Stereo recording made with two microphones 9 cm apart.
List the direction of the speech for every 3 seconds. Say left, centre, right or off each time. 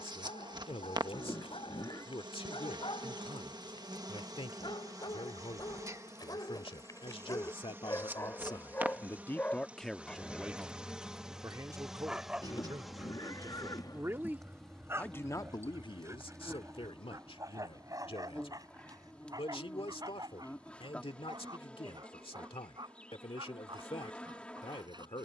left, left, left, centre, right, left, left, left, left.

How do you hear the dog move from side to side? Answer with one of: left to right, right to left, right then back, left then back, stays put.
left to right.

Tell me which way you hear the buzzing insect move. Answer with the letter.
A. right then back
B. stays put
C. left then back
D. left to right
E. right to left
E.